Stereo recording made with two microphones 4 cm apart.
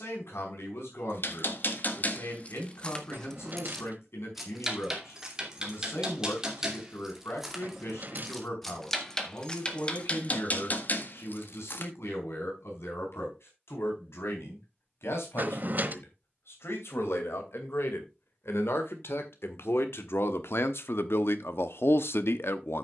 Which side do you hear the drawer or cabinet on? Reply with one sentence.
You can hear the drawer or cabinet on the right.